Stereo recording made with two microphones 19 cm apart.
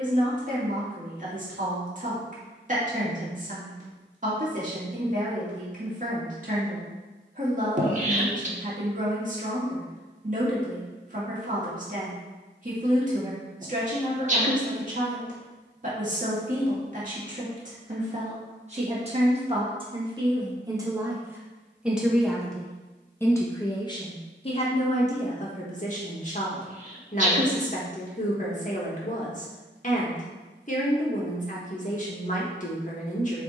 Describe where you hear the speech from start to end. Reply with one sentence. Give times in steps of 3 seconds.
In this clip you hear the speech on the right from 0 s, in the centre from 21 s and on the left from 24 s.